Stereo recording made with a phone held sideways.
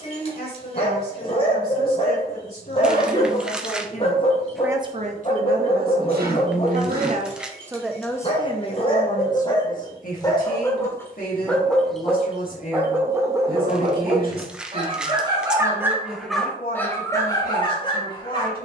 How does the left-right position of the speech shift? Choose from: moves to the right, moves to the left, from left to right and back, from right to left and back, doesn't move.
from left to right and back.